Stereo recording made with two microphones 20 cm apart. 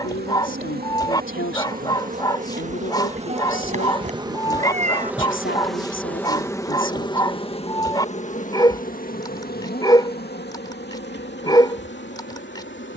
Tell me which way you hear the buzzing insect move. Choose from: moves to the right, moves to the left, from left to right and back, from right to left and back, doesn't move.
moves to the left.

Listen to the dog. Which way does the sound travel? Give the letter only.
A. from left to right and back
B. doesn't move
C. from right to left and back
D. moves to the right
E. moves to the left
B.